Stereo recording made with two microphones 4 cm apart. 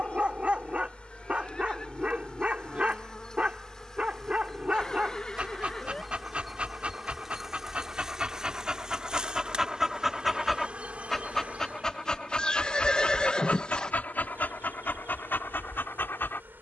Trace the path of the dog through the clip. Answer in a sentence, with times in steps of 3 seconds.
In this clip you hear the dog on the right from 0 s, in the centre from 9 s and on the left from 12 s.